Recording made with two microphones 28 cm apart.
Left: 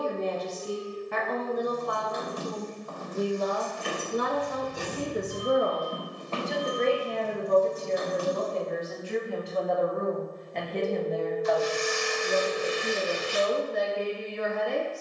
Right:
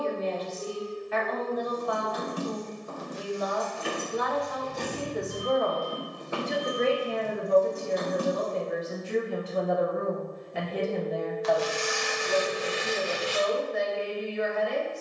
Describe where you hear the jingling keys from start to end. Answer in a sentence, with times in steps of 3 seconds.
You can hear the jingling keys on the right from 0 s, in the centre from 3 s, on the right from 6 s and not at all from 9 s.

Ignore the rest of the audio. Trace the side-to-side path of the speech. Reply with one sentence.
In this clip you hear the speech go right and come back.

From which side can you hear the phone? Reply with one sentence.
You can hear the phone in the centre.